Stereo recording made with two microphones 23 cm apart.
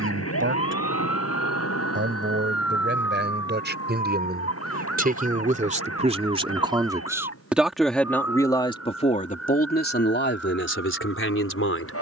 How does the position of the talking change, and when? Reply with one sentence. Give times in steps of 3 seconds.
You can hear the talking on the right from 0 s, in the centre from 6 s and on the left from 9 s.